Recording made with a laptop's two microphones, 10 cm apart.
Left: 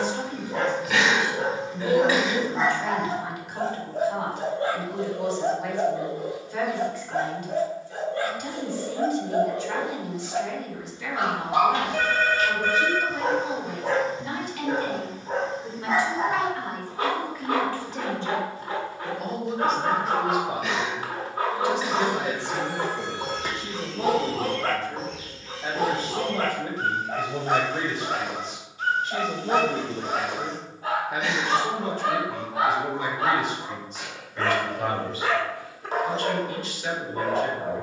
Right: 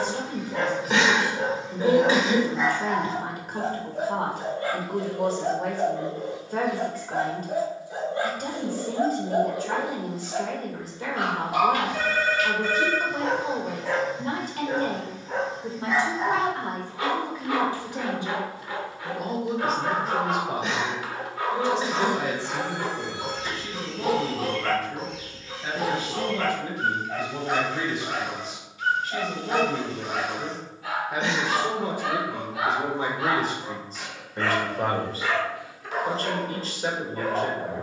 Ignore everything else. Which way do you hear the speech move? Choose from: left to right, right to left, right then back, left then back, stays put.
left then back.